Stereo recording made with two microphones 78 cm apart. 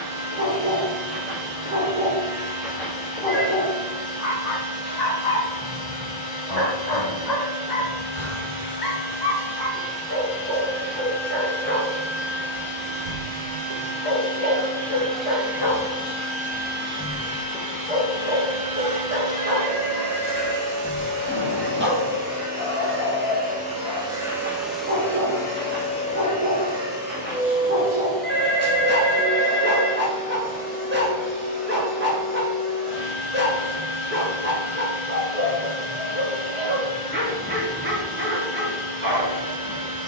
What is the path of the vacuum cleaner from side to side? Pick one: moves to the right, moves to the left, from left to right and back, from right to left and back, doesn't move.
from left to right and back.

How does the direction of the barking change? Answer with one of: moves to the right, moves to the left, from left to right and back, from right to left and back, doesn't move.
from right to left and back.